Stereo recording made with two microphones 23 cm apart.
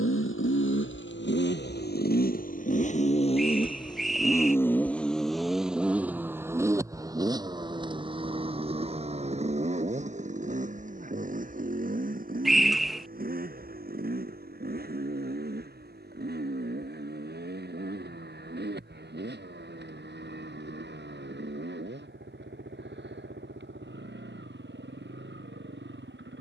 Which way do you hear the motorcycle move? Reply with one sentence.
In this clip you hear the motorcycle move to the right.